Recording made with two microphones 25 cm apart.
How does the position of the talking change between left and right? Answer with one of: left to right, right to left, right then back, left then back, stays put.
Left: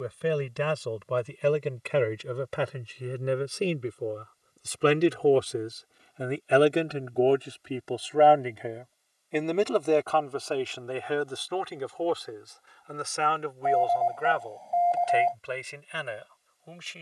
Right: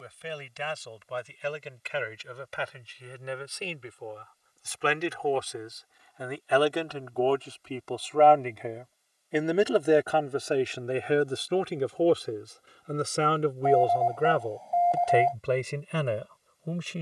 left to right.